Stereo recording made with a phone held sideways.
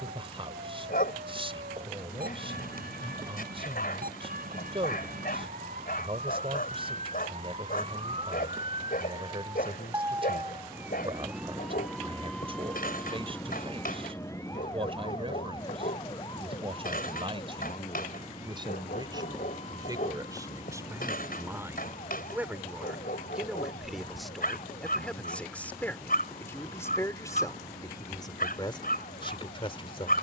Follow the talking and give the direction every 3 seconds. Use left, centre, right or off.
right, right, right, right, right, right, right, centre, centre, left.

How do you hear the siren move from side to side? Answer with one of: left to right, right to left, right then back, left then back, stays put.
right to left.